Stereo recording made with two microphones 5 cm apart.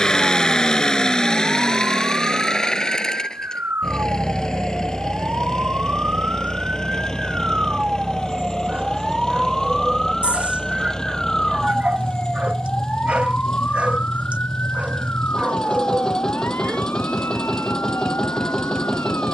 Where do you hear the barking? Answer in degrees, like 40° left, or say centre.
30° right.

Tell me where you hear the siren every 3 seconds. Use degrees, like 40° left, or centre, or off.
50° right, 40° right, 20° right, 10° left, 30° left, 50° left, 60° left.